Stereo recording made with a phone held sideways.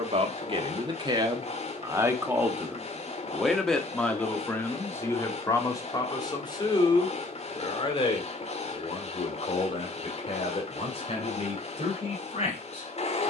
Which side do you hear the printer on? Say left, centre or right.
left.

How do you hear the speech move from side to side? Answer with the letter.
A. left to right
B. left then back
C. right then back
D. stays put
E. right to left
E.